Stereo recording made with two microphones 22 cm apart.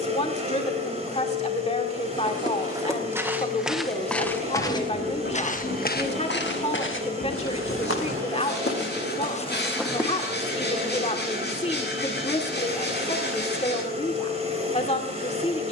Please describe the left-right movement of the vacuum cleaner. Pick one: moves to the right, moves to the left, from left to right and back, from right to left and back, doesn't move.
doesn't move.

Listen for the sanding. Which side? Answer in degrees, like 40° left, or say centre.
50° left.